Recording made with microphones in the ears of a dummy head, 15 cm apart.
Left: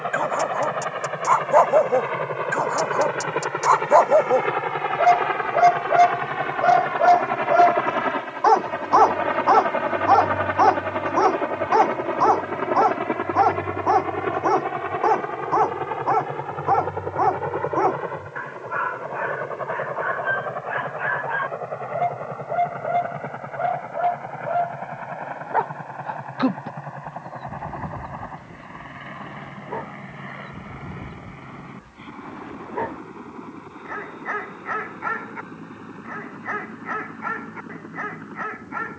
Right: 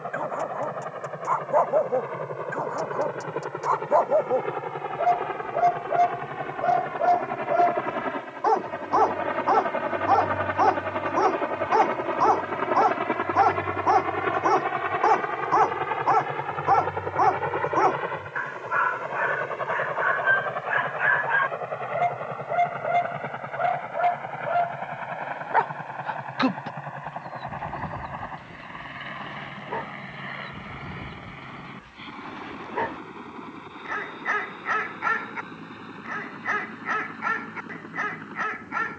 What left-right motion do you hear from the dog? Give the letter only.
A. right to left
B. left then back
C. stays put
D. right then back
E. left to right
E.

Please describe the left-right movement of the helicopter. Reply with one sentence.
In this clip you hear the helicopter go from the left side to the right.